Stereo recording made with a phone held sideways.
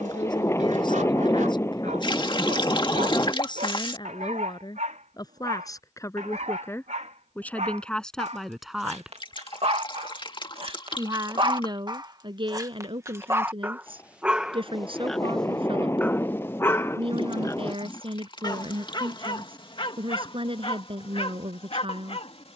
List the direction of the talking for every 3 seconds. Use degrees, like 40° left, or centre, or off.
40° left, 30° left, 10° left, 30° right, 40° right, 40° right, 40° right, 40° right.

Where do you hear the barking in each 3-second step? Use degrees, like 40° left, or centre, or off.
80° right, 70° right, 60° right, 50° right, 20° right, 20° left, 40° left, 50° left.